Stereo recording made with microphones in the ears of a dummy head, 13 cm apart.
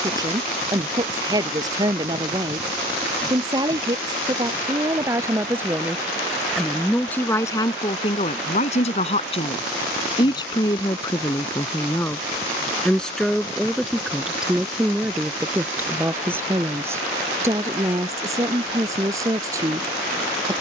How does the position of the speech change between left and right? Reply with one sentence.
In this clip you hear the speech go left and come back.